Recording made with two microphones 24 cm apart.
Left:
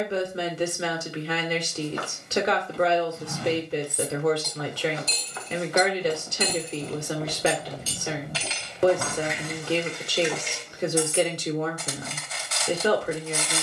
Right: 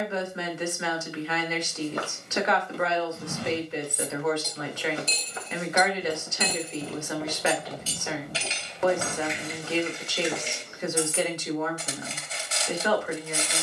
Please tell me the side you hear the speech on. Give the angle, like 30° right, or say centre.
40° left.